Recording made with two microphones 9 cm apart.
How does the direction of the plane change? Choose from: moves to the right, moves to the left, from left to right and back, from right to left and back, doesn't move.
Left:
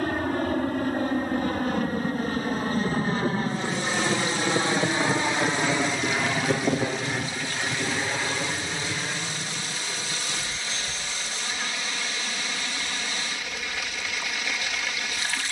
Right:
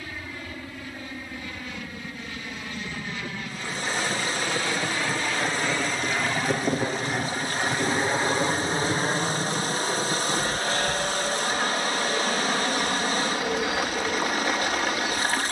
moves to the right.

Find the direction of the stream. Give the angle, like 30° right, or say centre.
40° right.